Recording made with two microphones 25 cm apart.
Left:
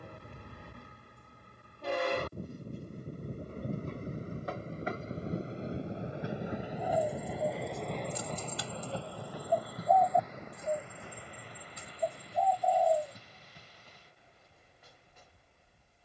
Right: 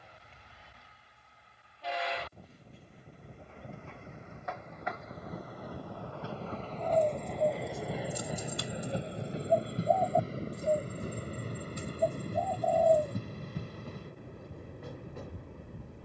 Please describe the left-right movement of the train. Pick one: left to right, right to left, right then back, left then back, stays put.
left to right.